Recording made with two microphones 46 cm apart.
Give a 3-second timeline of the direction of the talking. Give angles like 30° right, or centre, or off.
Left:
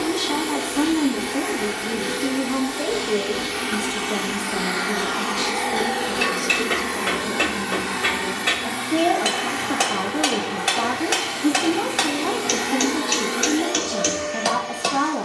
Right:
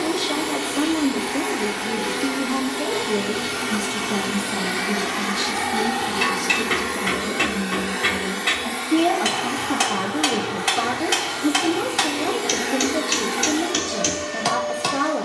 centre, 20° right, 40° right, centre, 10° left.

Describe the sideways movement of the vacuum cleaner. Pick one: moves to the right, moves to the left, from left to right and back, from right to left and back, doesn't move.
from right to left and back.